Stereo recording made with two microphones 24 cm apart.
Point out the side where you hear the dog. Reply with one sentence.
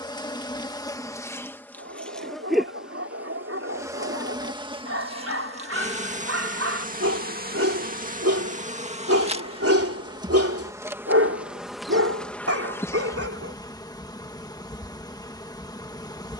You can hear the dog on the right.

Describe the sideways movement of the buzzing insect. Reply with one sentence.
In this clip you hear the buzzing insect go right and come back.